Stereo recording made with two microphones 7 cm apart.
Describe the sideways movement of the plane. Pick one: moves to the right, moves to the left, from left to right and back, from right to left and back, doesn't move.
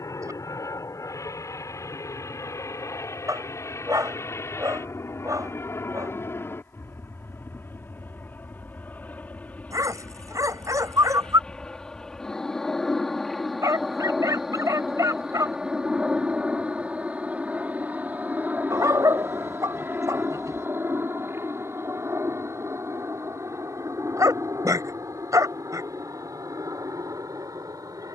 moves to the right.